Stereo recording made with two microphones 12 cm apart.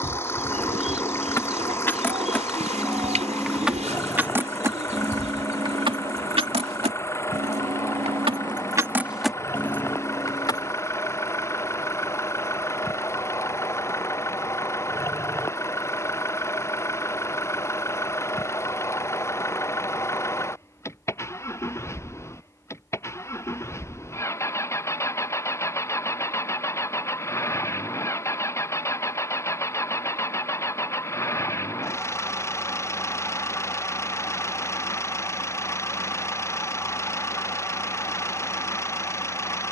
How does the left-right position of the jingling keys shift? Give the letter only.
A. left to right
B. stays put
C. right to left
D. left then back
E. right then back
E.